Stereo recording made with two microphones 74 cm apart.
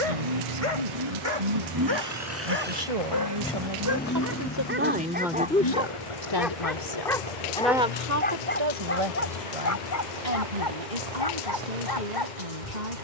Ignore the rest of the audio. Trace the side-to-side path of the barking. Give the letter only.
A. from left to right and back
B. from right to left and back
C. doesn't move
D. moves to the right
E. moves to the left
E.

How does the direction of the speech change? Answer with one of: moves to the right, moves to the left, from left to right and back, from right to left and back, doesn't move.
from right to left and back.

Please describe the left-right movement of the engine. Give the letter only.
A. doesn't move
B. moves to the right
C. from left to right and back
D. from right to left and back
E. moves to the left
E.